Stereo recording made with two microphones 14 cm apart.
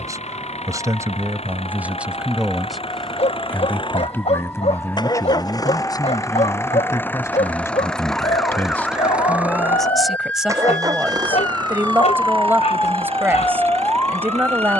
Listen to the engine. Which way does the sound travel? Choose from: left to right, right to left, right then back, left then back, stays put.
left to right.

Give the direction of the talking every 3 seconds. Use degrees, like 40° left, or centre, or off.
10° right, 20° left, 20° left, centre, 10° right.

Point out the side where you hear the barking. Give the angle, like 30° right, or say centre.
50° left.